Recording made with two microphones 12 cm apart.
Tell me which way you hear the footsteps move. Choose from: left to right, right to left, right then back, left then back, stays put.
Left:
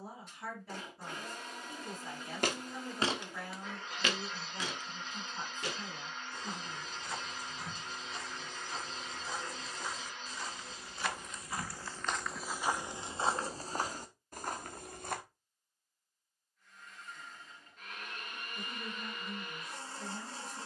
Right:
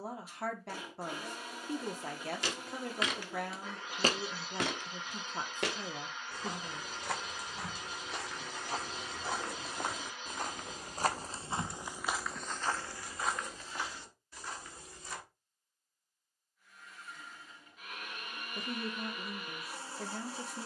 right then back.